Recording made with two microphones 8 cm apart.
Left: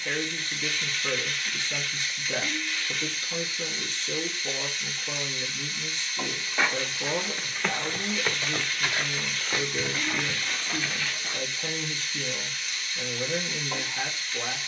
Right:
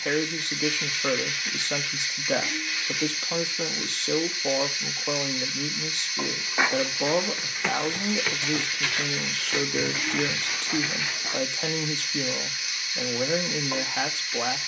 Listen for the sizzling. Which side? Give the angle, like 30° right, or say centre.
10° right.